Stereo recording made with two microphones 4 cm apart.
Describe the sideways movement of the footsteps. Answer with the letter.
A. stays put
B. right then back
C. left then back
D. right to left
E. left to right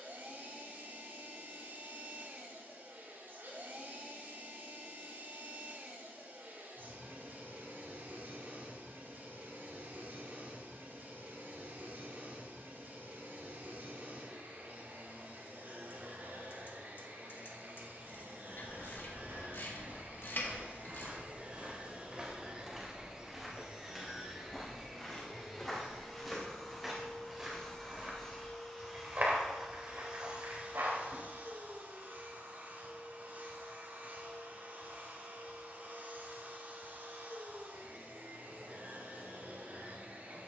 C.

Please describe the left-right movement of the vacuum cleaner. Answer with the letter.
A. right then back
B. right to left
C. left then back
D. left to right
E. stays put
C.